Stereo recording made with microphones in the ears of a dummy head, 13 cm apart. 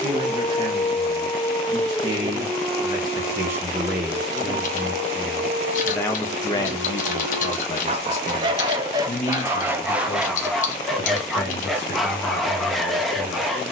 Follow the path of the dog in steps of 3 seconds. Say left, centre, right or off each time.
centre, right, right, centre, centre.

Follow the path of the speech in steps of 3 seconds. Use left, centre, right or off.
right, centre, left, left, left.